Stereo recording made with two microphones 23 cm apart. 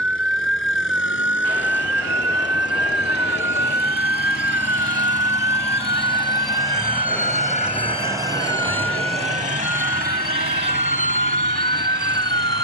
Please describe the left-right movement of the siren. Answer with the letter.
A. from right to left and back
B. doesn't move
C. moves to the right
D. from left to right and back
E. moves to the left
C.